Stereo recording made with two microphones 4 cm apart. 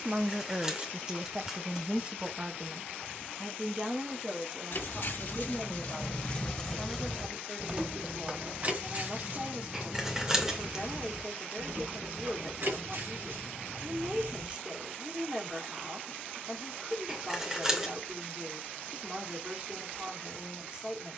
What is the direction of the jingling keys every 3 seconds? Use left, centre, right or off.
off, left, centre, right, right, off, off.